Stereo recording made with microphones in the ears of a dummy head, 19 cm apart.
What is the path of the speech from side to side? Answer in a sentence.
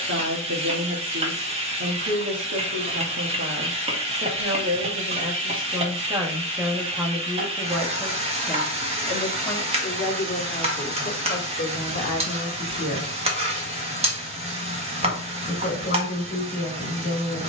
In this clip you hear the speech travel towards the left.